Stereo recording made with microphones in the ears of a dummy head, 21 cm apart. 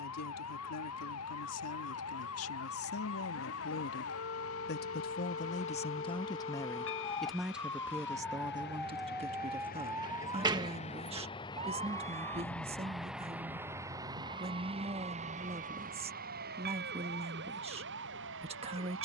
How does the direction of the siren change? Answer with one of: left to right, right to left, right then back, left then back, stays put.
left to right.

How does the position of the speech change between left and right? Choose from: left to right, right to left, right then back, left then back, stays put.
left to right.